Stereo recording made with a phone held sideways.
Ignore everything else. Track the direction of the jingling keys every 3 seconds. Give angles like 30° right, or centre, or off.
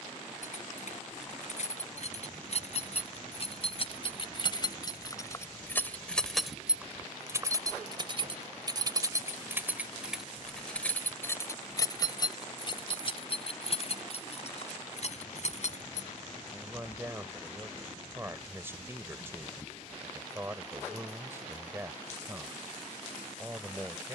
50° left, 30° left, 20° right, centre, 40° left, 60° left, off, off.